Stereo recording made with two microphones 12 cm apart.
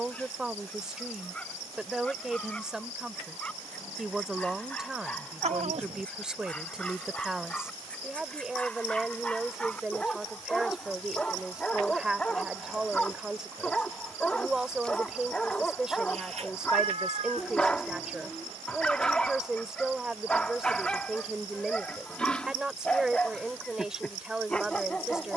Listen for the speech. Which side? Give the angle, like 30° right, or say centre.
10° right.